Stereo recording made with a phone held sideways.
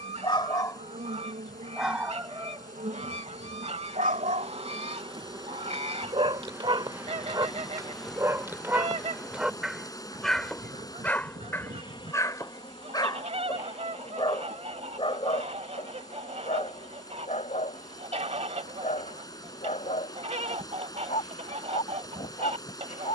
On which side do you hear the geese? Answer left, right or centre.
right.